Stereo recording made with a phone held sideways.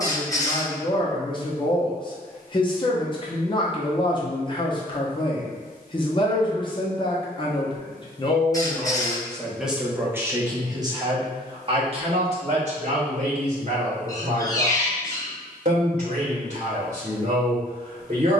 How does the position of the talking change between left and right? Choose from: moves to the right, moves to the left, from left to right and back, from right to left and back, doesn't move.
moves to the right.